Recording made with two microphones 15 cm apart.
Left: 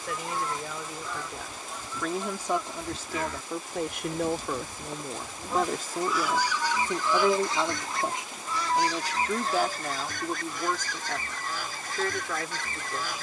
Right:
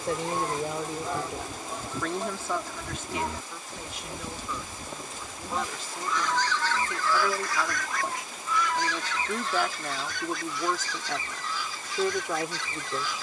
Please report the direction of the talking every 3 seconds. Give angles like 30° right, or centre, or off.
10° right, 50° left, 30° left, centre, 20° right.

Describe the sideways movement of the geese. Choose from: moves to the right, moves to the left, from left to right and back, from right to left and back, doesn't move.
moves to the left.